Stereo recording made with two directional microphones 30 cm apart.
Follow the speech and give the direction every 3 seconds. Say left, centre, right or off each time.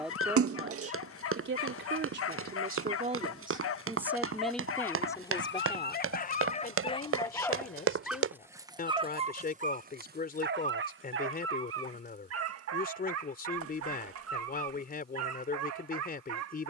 right, centre, left, left, left, left.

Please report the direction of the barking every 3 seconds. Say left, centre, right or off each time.
left, left, centre, right, right, right.